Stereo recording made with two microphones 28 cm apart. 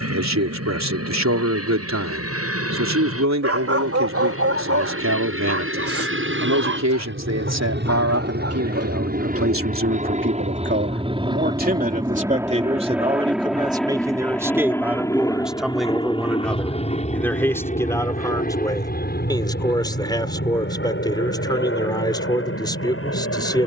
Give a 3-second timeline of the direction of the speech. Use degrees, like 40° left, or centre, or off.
70° right, 70° right, 60° right, 40° right, 20° right, centre, 10° left, 10° left.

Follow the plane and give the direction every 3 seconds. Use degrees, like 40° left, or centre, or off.
60° right, 60° right, 40° right, 20° right, centre, 20° left, 30° left, 40° left.